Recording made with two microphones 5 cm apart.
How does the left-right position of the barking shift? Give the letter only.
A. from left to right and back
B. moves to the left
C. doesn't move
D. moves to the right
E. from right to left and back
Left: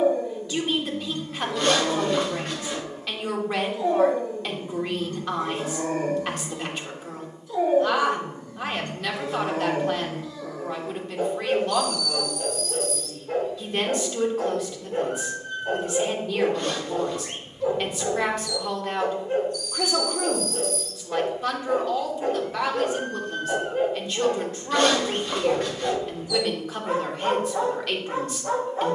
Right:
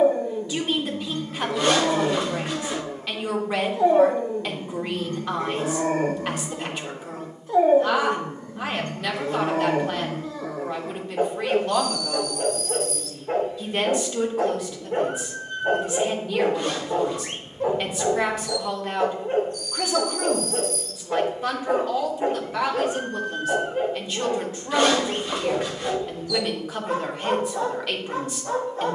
B.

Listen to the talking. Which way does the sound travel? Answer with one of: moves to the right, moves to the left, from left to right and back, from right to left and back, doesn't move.
doesn't move.